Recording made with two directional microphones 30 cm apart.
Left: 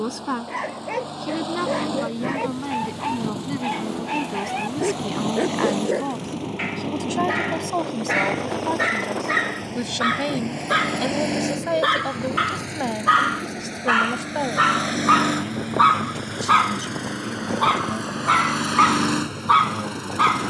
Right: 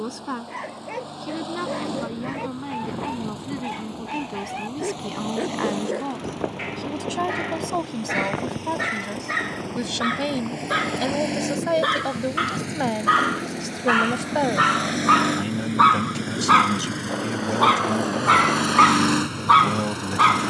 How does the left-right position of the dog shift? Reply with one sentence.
In this clip you hear the dog move from left to right.